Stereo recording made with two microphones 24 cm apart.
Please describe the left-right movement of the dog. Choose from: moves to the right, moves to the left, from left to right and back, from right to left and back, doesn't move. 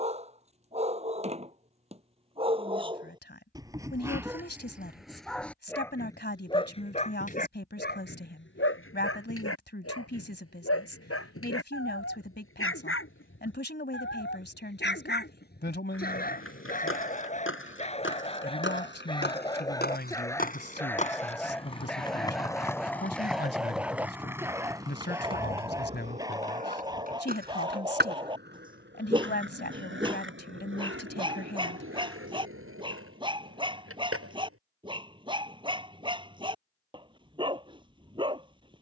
from right to left and back.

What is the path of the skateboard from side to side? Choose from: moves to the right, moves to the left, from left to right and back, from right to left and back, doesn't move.
moves to the right.